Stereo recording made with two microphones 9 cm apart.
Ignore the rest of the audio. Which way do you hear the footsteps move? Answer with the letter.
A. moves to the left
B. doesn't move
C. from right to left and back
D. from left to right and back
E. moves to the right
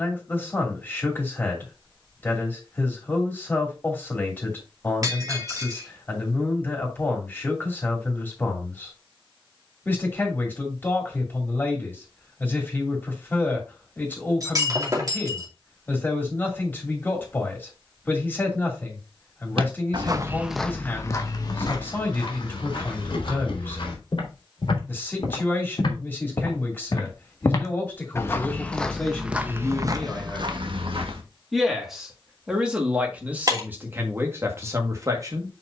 C.